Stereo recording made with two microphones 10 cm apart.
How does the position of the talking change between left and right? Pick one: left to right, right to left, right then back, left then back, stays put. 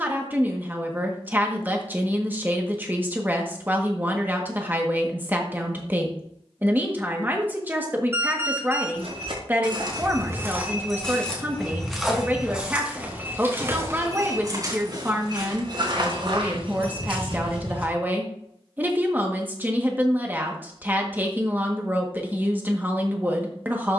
stays put.